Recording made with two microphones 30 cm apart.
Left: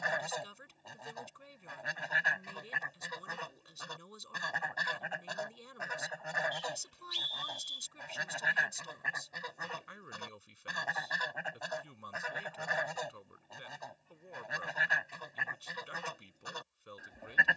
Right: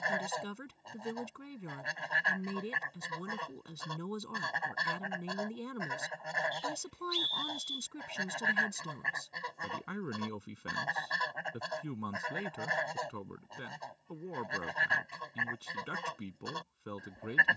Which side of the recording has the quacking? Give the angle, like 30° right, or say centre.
centre.